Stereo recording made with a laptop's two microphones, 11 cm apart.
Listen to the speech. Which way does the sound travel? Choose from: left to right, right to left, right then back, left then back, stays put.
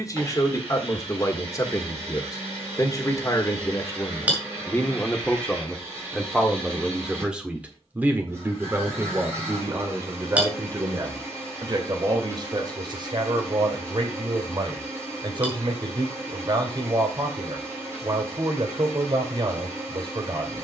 left to right.